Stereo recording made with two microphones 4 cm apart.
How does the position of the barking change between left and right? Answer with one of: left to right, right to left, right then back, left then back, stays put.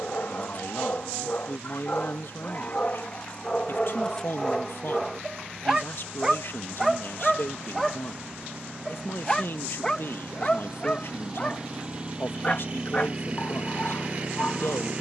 right then back.